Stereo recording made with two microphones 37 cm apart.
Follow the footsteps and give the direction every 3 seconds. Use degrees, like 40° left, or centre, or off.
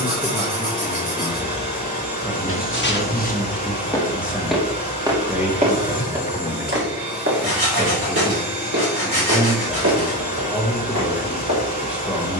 30° left, centre, 30° right, 50° right.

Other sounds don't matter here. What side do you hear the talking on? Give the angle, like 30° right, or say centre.
centre.